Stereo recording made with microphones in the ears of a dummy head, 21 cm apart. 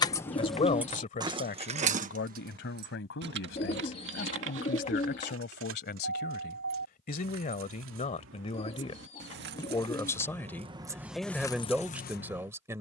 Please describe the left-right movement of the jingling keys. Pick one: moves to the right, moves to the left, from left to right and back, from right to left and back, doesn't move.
from left to right and back.